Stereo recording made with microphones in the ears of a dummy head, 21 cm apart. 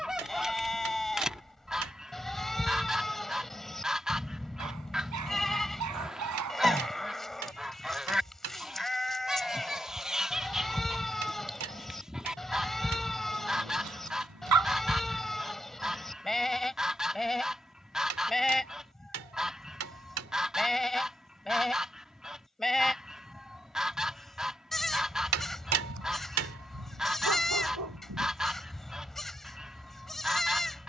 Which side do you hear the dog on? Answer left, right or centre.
right.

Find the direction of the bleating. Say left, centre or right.
centre.